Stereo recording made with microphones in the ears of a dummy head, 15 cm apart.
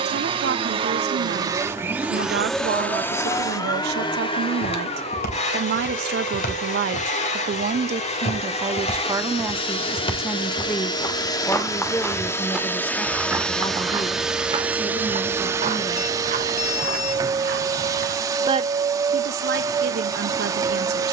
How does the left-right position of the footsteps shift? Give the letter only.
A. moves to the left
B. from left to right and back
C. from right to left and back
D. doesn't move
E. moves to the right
E.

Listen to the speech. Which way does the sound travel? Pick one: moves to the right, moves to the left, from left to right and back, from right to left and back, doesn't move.
from right to left and back.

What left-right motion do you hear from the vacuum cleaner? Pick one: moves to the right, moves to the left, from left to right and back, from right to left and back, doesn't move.
from right to left and back.